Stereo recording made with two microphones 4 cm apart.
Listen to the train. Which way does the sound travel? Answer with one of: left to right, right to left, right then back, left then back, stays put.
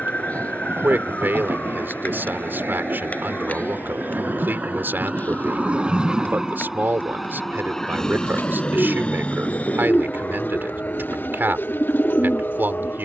right to left.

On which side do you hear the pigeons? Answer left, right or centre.
left.